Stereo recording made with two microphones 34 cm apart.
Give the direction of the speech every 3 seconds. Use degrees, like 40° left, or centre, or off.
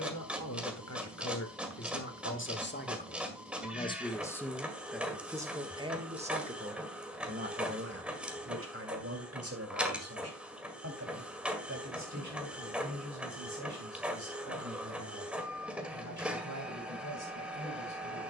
40° left, centre, 30° right, 50° right, 60° right, 60° right.